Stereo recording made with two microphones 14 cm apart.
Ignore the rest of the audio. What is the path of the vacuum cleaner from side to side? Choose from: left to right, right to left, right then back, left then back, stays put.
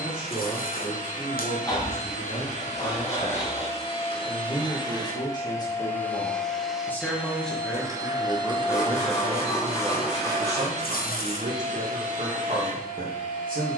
left to right.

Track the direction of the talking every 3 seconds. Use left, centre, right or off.
left, left, centre, right, right.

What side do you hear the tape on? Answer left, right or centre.
left.